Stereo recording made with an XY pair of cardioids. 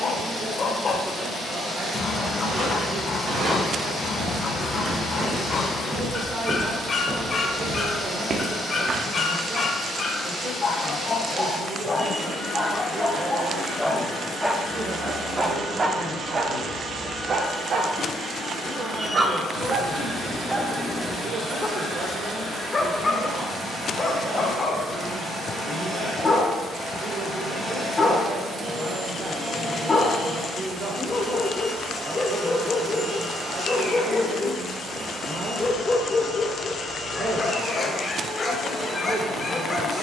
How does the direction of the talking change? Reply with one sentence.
You can hear the talking stay in one place.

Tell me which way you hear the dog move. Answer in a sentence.
You can hear the dog go right and come back.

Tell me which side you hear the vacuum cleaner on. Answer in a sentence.
You can hear the vacuum cleaner on the right.